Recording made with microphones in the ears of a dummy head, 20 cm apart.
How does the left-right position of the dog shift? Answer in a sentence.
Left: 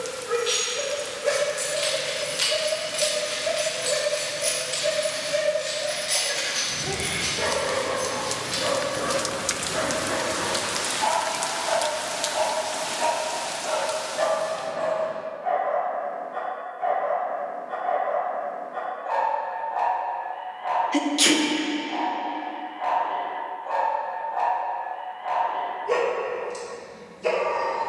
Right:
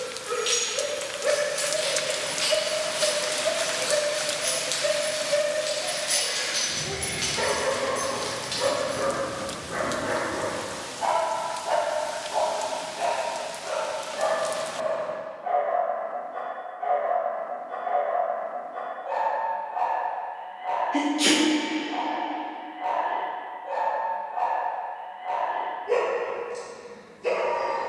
You can hear the dog move from right to left.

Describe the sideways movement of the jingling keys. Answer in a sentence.
You can hear the jingling keys move from right to left and back again.